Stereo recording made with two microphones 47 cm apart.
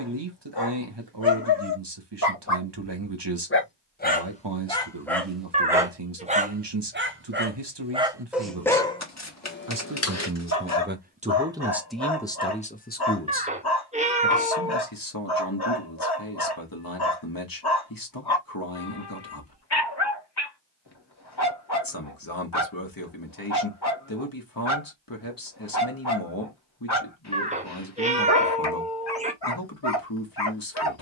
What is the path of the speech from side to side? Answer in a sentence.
In this clip you hear the speech go from the right side to the left.